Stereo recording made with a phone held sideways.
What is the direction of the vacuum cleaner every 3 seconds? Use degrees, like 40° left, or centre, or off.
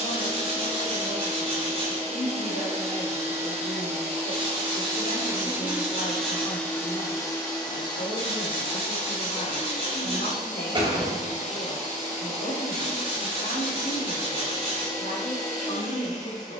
40° right, 30° right, 20° left, 40° left, 50° left, 50° left.